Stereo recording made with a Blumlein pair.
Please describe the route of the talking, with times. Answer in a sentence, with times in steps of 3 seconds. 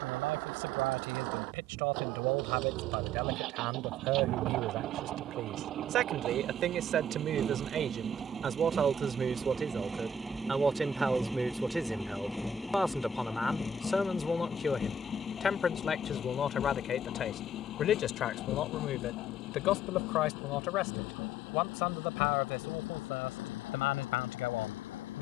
In this clip you hear the talking on the right from 0 s, in the centre from 9 s and on the left from 15 s.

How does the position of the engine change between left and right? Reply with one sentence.
You can hear the engine travel towards the left.